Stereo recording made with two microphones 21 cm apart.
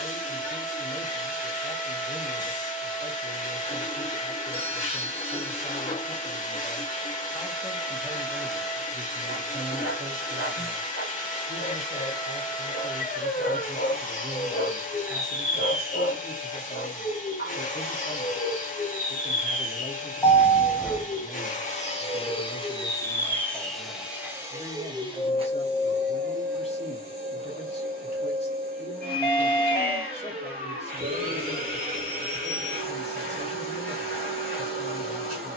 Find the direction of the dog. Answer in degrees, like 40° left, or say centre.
50° left.